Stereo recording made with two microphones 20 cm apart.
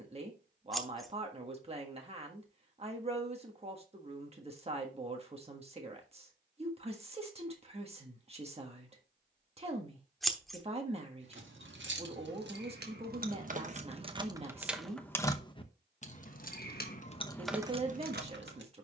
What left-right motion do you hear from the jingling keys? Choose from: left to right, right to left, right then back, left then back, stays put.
left then back.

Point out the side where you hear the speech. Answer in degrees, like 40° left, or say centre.
30° right.